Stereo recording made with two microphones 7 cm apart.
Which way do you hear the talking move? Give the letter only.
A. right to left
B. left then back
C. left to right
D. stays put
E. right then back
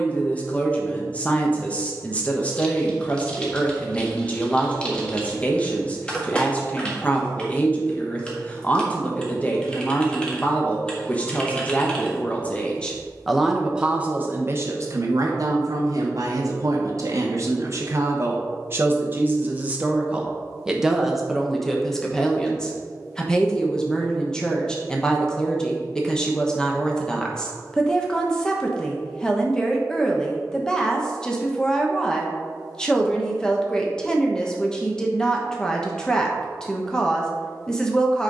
E.